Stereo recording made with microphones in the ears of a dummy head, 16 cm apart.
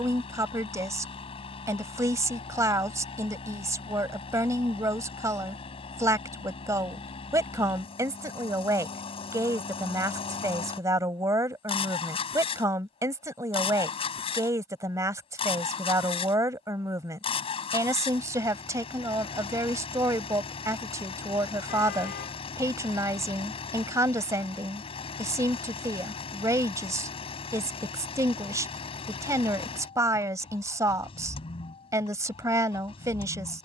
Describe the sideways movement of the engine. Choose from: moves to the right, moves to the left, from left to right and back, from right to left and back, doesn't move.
doesn't move.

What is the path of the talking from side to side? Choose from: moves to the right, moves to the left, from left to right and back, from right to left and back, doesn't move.
doesn't move.